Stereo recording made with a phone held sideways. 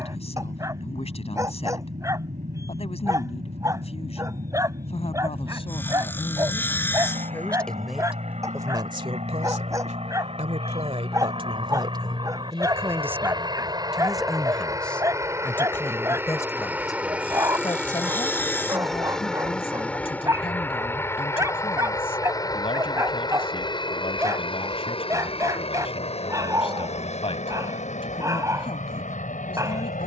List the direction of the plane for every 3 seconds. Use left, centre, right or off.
right, right, right, right, right, centre, centre, left, left, left.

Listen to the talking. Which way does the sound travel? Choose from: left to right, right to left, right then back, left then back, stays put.
right then back.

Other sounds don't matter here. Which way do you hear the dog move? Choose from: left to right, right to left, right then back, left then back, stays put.
stays put.